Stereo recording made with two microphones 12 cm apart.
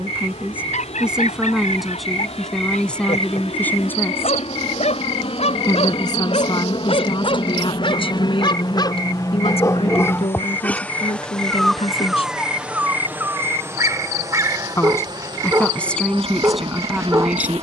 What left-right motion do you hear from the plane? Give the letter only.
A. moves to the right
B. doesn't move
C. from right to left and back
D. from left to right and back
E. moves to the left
A.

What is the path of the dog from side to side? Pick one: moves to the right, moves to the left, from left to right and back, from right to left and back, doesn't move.
moves to the right.